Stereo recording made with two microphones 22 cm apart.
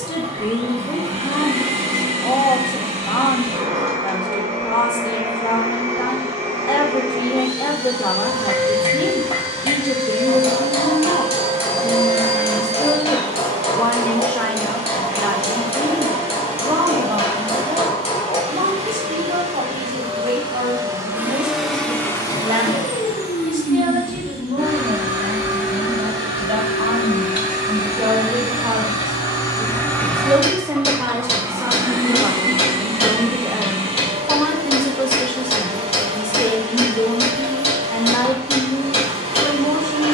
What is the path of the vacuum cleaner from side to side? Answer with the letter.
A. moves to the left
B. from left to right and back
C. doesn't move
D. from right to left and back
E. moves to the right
D.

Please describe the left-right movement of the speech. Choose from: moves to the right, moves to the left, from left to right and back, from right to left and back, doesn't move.
from left to right and back.